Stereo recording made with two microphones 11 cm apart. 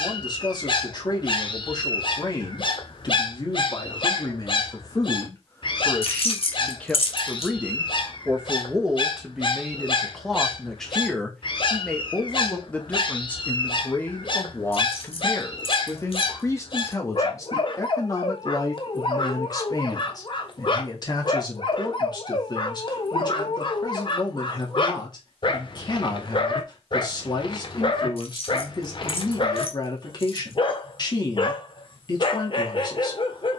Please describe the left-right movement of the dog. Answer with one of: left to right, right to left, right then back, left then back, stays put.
stays put.